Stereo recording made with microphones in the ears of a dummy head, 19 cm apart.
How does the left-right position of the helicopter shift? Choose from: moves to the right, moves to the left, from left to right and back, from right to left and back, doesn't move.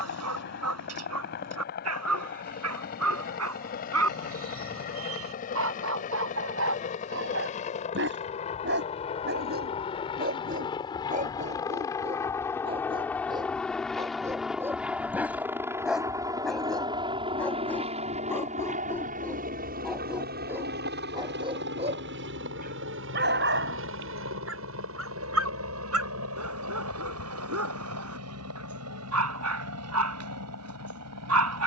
moves to the right.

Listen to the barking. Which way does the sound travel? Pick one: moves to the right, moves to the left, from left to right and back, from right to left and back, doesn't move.
from right to left and back.